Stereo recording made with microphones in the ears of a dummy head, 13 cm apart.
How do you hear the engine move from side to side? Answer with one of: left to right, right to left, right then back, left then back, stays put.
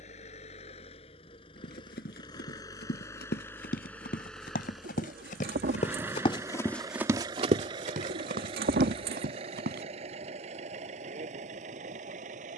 left to right.